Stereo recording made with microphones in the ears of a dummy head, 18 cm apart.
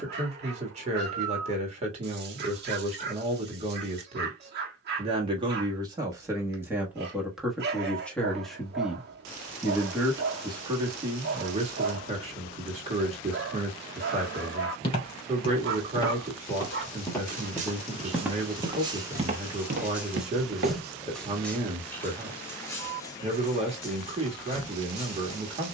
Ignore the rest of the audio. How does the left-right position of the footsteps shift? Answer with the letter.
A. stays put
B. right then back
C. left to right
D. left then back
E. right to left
C.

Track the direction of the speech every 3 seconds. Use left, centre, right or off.
right, right, centre, right, right, right, right, right, right.